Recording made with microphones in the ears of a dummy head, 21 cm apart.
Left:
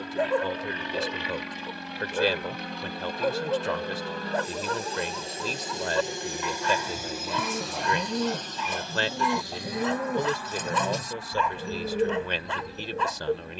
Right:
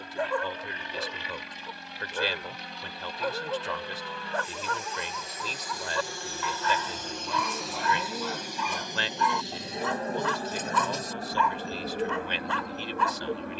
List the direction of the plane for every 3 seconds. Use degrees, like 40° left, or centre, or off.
60° left, 30° left, centre, 30° right, 40° right.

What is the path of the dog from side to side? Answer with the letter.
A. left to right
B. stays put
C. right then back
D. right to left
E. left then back
B.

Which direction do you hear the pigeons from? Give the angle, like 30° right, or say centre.
60° left.